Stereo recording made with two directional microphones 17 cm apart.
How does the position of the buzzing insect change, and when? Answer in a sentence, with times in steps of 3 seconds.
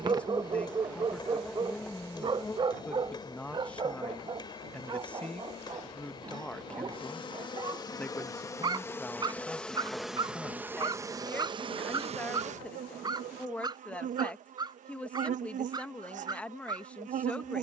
You can hear the buzzing insect in the centre from 0 s, on the left from 3 s, in the centre from 9 s and on the right from 12 s.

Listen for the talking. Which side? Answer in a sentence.
In this clip you hear the talking in the centre.